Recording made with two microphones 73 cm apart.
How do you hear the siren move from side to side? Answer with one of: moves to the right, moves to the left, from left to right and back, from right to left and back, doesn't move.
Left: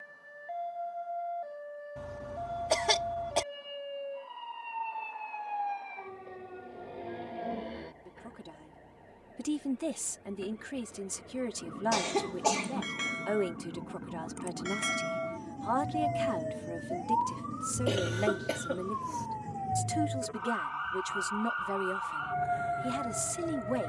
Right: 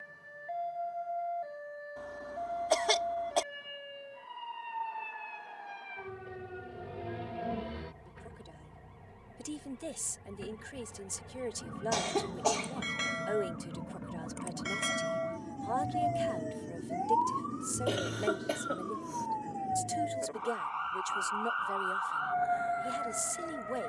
moves to the left.